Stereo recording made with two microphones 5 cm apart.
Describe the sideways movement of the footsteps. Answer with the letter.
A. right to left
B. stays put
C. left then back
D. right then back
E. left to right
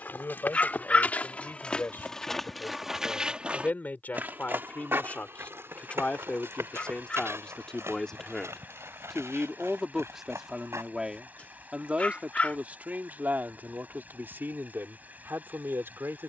E.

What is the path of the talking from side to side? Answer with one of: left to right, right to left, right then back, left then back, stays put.
left to right.